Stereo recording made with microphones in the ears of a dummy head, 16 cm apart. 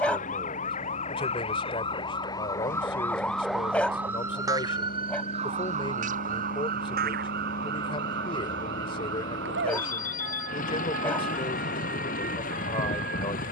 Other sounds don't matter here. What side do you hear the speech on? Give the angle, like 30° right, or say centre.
30° left.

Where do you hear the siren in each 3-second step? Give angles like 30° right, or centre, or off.
30° left, 20° right, 60° right, 80° right, 80° right.